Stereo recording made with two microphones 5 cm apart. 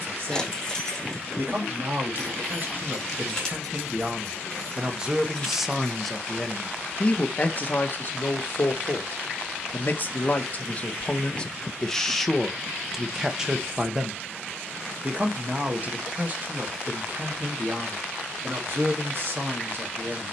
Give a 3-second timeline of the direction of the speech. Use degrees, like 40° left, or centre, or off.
50° right, 20° right, 30° left, 30° left, 10° right, 40° right, 50° right.